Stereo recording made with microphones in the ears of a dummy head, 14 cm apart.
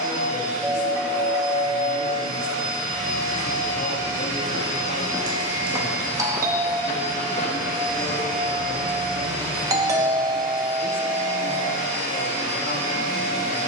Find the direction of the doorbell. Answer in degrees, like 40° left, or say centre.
20° right.